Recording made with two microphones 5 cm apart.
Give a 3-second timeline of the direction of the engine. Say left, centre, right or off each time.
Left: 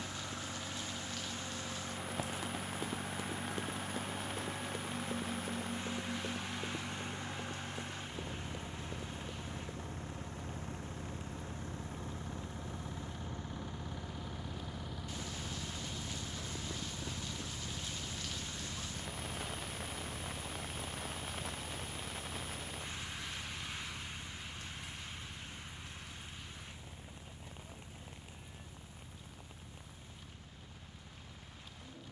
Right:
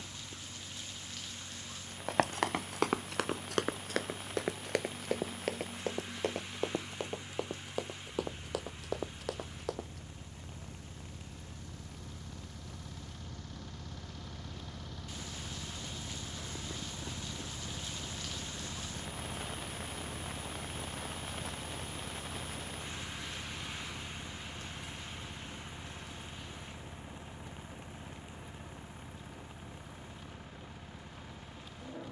left, left, left, left, left, centre, right, right, right, right, right.